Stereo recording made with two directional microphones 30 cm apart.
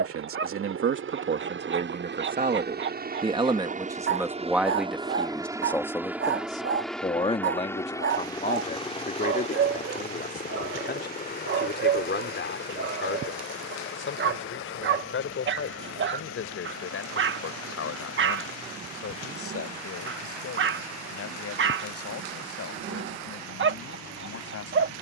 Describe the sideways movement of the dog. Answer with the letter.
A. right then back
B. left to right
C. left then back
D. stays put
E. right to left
D.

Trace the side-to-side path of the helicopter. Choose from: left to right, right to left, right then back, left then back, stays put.
right to left.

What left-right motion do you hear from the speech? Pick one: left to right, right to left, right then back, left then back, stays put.
right to left.